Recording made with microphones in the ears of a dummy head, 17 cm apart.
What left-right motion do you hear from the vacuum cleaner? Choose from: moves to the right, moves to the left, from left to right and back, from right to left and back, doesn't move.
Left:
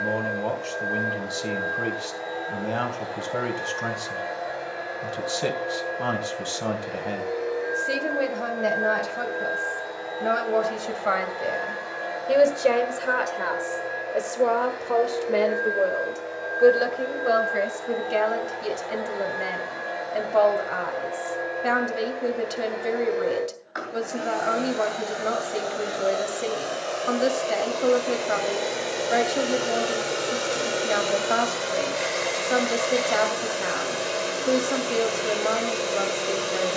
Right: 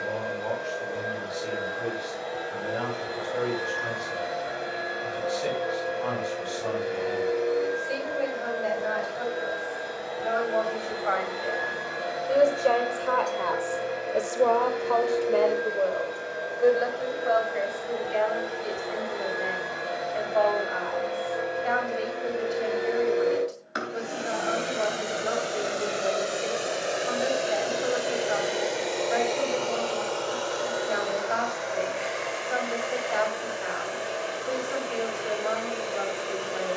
moves to the left.